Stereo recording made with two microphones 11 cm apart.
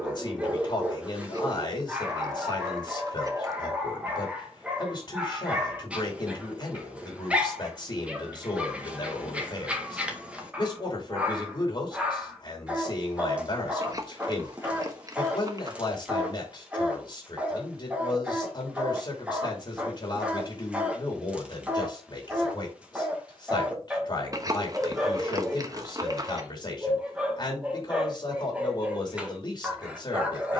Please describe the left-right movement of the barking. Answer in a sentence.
You can hear the barking stay put.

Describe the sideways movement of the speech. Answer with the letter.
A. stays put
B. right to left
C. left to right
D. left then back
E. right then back
A.